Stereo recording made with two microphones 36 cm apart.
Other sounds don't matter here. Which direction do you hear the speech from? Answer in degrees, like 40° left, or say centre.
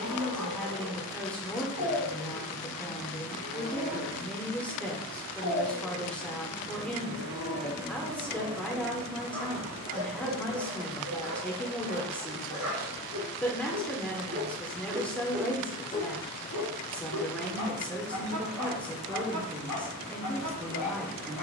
centre.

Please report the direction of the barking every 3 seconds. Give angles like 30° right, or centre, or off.
60° left, 60° left, 20° left, 50° right, 50° right, 40° left, 60° left.